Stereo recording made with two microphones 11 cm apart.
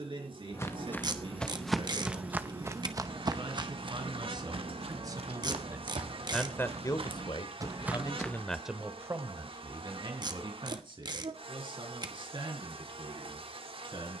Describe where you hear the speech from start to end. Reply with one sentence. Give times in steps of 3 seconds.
You can hear the speech on the right from 0 s, on the left from 6 s and on the right from 9 s.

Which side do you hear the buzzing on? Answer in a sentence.
You can hear the buzzing on the right.